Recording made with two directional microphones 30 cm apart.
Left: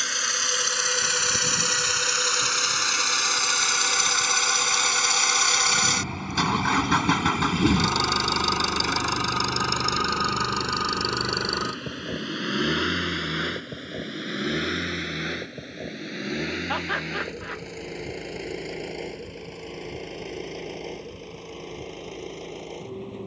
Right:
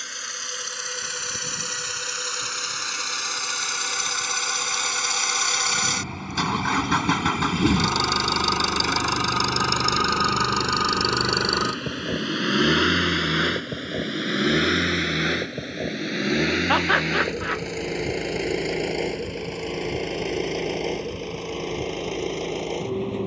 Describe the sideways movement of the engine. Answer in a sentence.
In this clip you hear the engine move to the right.